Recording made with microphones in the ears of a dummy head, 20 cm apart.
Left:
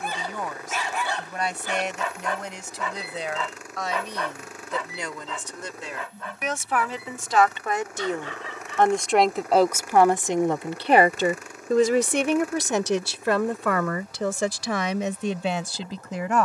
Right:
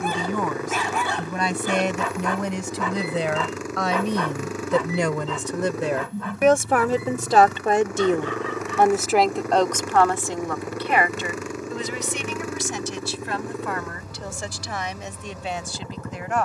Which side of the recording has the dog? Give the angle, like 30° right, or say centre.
70° right.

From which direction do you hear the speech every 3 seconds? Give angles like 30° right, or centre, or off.
70° right, 50° right, 30° right, 20° left, 50° left, 70° left.